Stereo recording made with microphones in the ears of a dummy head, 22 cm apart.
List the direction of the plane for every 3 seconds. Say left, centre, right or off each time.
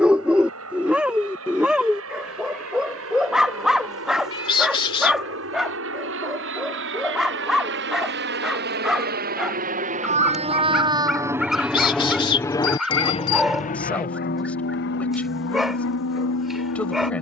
right, right, right, right, left, left.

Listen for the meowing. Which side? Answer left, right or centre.
left.